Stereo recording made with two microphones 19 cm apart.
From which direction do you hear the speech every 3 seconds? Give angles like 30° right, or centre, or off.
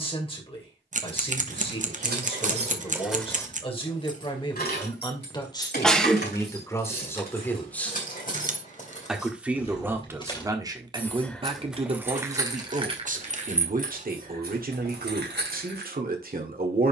30° left, 30° left, 10° left, 20° right, 40° right, 50° right.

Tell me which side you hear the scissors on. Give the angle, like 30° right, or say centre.
40° right.